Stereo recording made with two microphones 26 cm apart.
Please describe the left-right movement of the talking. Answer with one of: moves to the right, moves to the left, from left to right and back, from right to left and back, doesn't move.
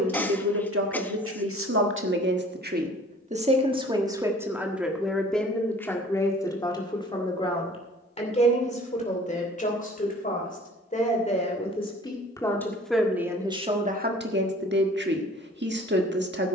from right to left and back.